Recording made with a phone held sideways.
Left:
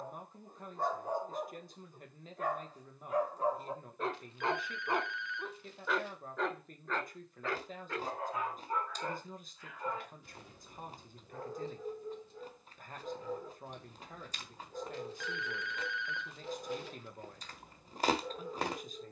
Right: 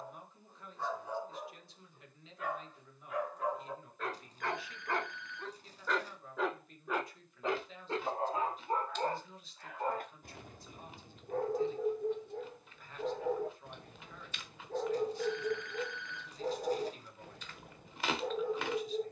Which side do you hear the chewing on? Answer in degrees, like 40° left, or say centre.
40° left.